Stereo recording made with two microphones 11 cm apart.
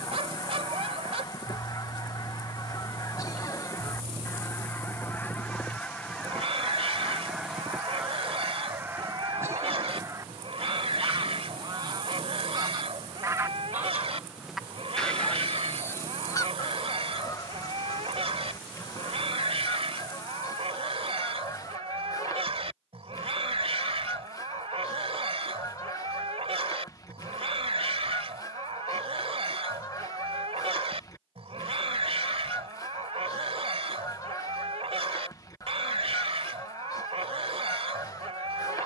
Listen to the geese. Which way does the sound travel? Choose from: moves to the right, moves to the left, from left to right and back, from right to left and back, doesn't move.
from left to right and back.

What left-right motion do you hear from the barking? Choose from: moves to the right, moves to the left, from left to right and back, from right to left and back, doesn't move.
doesn't move.